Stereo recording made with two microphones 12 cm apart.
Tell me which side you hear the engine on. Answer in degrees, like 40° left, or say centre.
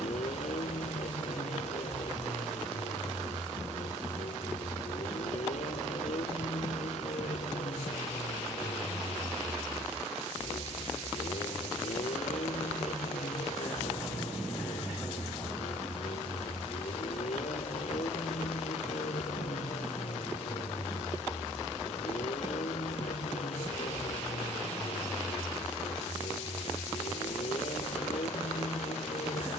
70° left.